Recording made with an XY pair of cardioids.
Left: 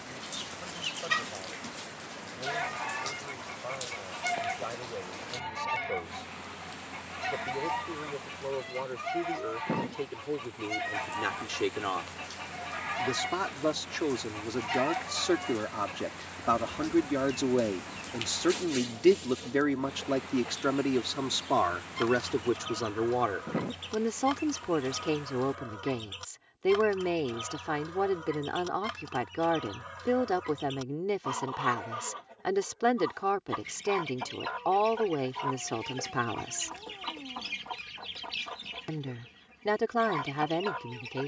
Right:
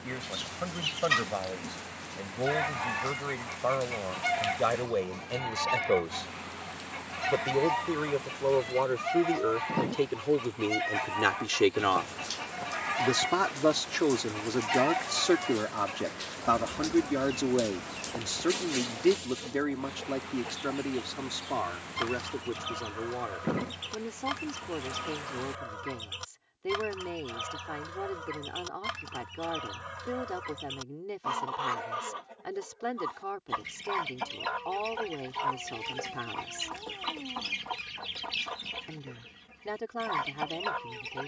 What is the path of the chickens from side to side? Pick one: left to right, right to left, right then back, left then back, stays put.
stays put.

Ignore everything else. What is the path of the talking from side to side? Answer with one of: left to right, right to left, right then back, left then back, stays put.
right to left.